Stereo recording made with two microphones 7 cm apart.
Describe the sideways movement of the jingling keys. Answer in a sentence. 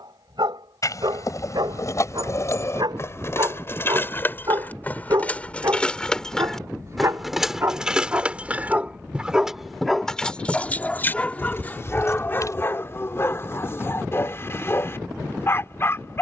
You can hear the jingling keys go right and come back.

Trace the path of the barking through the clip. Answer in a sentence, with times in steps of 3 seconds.
You can hear the barking on the right from 0 s, in the centre from 9 s and on the left from 12 s.